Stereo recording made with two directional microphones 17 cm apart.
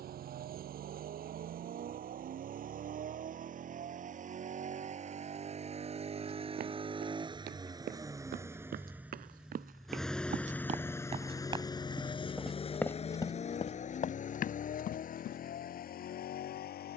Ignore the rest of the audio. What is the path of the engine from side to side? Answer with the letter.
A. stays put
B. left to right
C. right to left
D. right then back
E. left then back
C.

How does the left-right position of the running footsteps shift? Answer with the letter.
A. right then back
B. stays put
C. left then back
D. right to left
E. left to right
D.